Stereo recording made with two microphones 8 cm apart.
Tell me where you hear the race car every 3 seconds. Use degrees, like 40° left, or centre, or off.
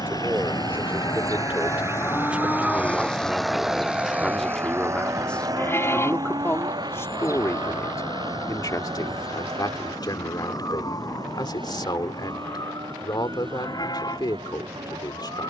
40° left, 30° right, 70° right, 80° right, 80° right.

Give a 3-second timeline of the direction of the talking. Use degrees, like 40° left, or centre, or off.
20° right, centre, 40° left, 60° left, 60° left.